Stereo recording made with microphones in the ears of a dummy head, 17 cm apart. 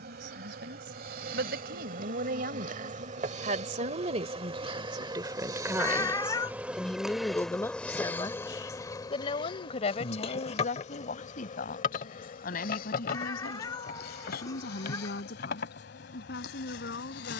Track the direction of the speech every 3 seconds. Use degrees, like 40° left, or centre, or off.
60° right, 30° right, 10° left, 40° left, 50° left, 60° left.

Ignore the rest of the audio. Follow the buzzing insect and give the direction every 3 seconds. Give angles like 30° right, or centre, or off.
50° right, 30° right, centre, 30° left, 50° left, 60° left.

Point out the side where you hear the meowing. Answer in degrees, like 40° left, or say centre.
20° left.